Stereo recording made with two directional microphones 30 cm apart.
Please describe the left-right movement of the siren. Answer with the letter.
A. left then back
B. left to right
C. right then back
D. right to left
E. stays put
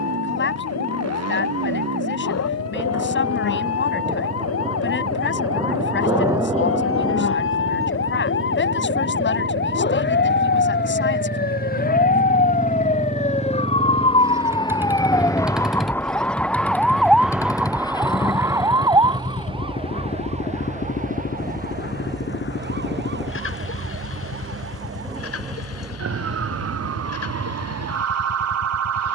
B.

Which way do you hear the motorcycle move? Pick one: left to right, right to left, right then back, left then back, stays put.
right to left.